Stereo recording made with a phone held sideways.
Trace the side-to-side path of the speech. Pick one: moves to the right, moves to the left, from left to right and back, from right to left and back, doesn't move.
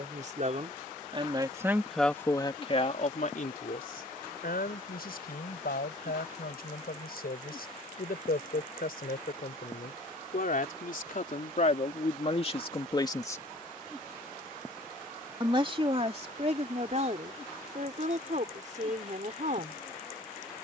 from right to left and back.